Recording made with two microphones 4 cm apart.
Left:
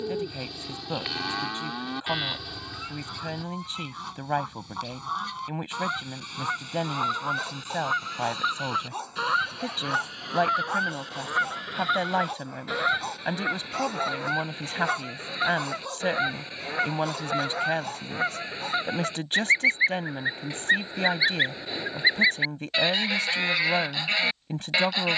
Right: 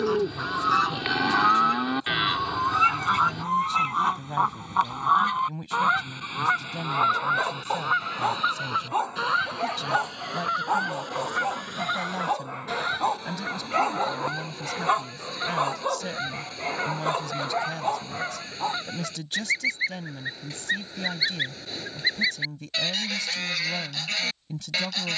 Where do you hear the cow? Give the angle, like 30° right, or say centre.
20° right.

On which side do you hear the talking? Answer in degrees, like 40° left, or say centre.
40° left.